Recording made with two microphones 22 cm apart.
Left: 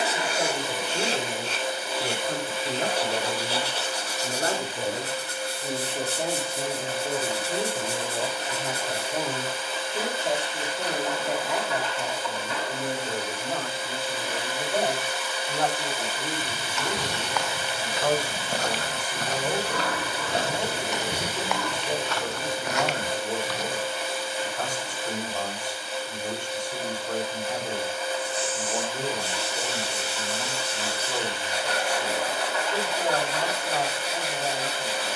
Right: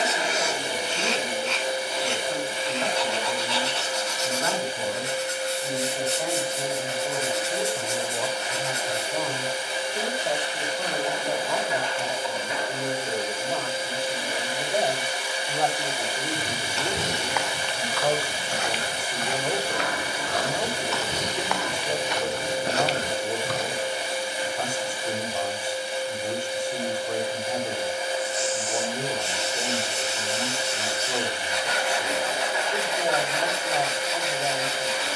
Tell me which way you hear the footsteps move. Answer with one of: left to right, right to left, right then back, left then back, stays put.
left then back.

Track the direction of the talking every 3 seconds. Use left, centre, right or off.
left, left, left, centre, centre, centre, centre, centre, centre, centre, centre, centre.